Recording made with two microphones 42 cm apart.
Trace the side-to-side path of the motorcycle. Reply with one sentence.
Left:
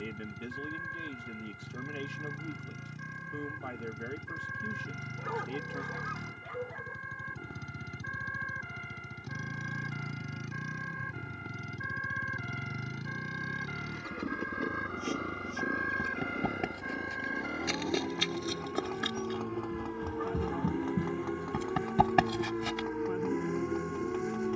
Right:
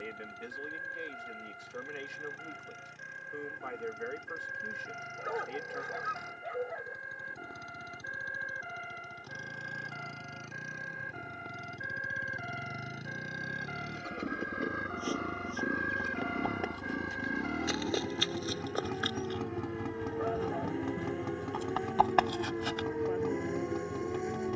In this clip you hear the motorcycle move from left to right.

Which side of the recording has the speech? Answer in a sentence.
You can hear the speech on the left.